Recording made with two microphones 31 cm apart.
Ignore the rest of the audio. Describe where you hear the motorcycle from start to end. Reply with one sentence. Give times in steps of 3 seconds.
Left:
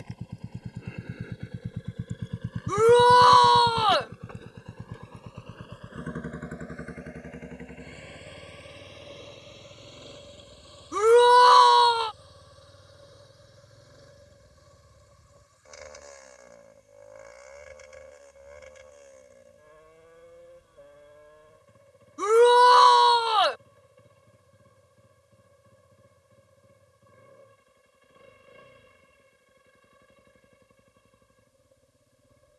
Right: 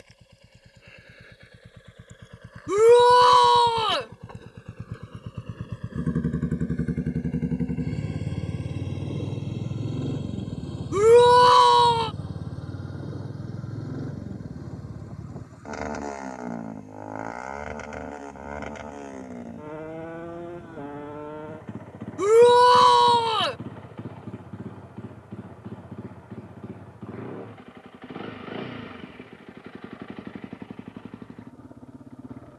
You can hear the motorcycle on the left from 0 s, in the centre from 3 s and on the right from 6 s.